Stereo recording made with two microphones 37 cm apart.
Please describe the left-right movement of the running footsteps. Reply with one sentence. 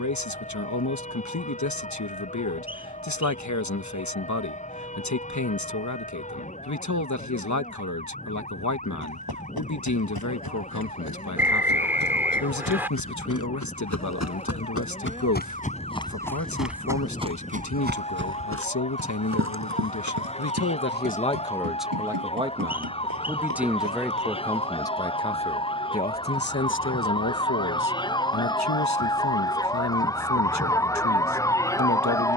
In this clip you hear the running footsteps travel towards the right.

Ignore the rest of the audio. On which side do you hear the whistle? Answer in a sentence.
You can hear the whistle in the centre.